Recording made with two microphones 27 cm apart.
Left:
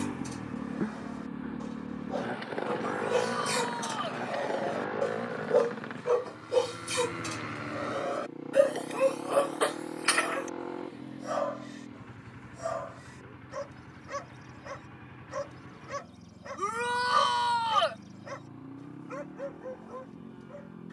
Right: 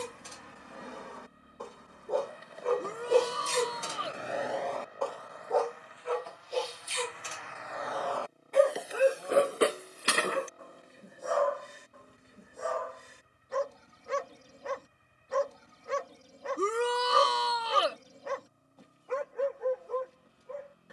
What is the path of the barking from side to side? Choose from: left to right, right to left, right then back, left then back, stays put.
left then back.